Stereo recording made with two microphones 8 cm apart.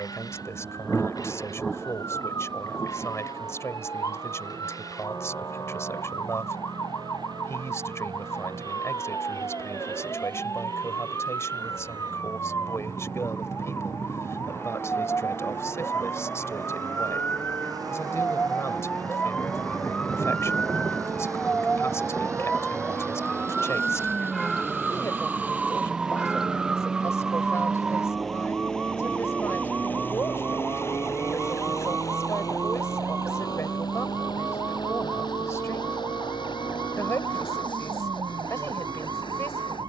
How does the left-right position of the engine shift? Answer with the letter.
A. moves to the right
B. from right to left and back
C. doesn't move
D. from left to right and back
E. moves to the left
E.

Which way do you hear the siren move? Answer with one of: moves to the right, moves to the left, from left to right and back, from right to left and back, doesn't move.
moves to the right.